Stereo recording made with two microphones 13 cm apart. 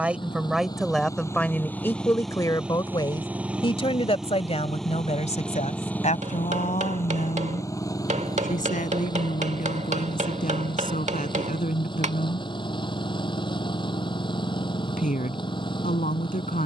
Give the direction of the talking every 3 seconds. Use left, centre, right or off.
centre, left, left, left, left, left.